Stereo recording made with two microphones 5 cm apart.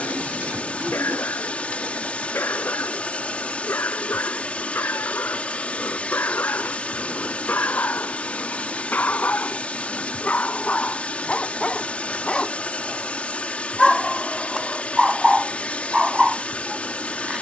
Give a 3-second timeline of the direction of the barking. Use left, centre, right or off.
left, left, left, left, centre, centre.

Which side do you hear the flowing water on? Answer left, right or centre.
left.